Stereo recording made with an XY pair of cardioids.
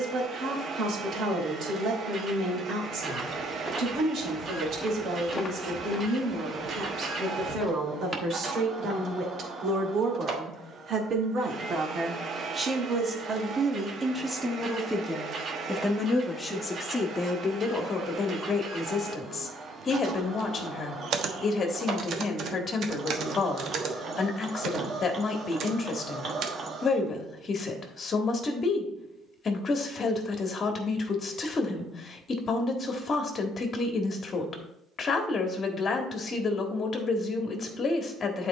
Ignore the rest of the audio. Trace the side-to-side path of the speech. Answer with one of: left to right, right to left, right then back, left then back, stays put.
right to left.